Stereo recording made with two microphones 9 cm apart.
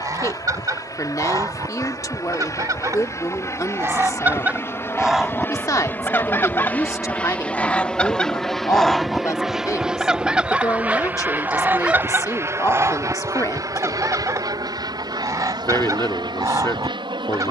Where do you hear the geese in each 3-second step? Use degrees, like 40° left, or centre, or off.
40° right, 20° right, 20° left, 10° right, 30° right, 40° right.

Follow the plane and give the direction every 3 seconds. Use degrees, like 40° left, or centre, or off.
40° left, 30° left, 10° left, 10° right, 40° right, 50° right.